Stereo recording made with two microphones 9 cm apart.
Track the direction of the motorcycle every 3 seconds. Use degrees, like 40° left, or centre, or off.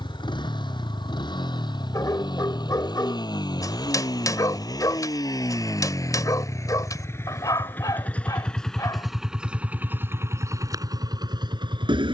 50° left, 40° left, 20° left, 30° right.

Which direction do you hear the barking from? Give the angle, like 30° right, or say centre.
40° left.